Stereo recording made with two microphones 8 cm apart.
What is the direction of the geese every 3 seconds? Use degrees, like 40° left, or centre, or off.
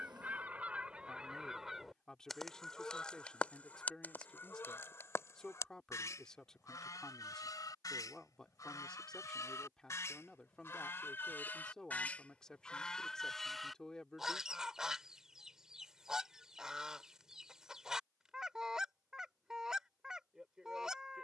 10° right, 30° left, 50° left, 30° left, centre, 10° right, 10° right.